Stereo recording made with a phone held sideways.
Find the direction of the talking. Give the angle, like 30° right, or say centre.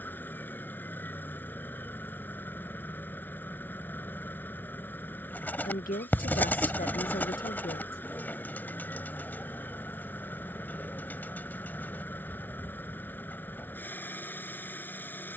80° left.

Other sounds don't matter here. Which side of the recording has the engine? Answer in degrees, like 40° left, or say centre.
10° left.